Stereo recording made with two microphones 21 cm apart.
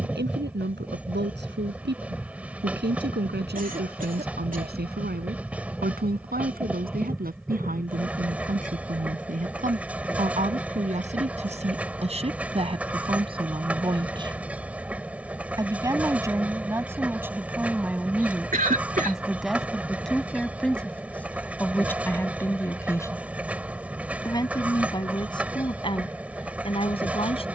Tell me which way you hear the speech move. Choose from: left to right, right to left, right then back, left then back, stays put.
right to left.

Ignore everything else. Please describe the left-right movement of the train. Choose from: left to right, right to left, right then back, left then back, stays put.
stays put.